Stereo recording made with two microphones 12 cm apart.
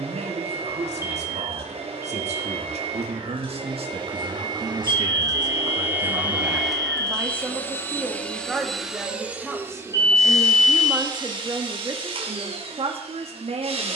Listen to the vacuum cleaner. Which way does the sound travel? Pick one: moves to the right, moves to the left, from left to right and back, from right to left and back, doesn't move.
from right to left and back.